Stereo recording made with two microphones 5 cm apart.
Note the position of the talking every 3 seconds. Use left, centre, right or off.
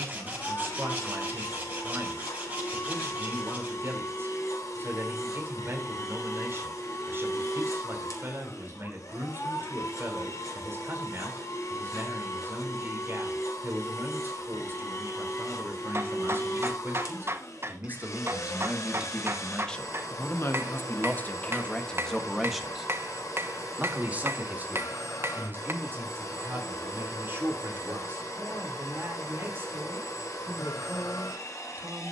right, right, right, right, right, right, centre, centre, right, right, right.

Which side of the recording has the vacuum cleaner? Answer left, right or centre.
left.